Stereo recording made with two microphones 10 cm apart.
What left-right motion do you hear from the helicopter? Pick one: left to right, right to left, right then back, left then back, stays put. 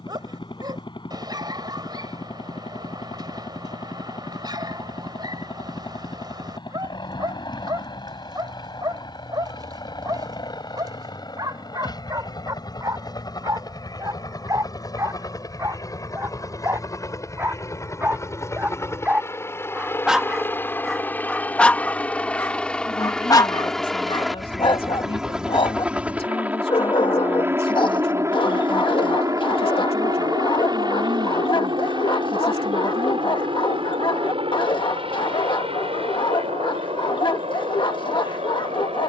left to right.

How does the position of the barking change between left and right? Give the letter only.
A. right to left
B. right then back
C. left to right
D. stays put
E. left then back
A.